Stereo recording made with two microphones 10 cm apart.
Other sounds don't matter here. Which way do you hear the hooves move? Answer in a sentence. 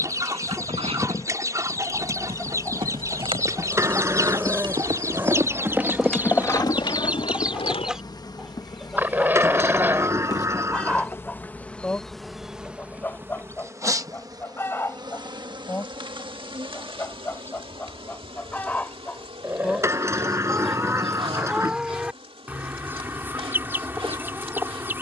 In this clip you hear the hooves go from the right side to the left.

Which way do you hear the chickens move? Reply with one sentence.
In this clip you hear the chickens move from right to left and back again.